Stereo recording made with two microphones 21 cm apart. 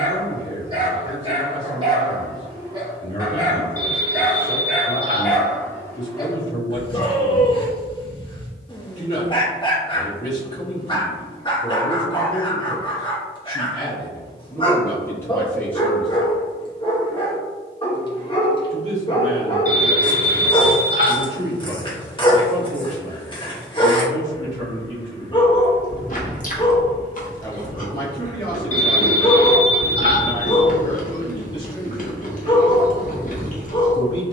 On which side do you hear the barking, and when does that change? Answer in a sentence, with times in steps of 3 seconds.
In this clip you hear the barking on the right from 0 s, in the centre from 3 s and on the left from 6 s.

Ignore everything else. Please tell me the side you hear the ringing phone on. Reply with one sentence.
In this clip you hear the ringing phone on the right.